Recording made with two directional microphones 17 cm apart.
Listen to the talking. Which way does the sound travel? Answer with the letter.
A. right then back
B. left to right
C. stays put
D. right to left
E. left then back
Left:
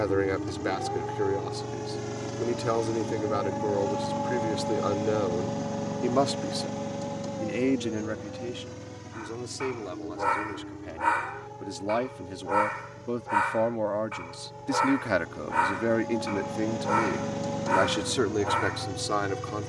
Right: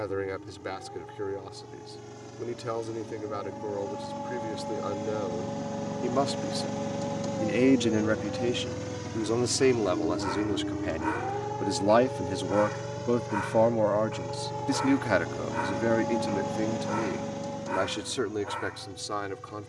A.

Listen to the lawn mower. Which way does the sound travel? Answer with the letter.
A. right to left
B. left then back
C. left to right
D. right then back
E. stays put
D.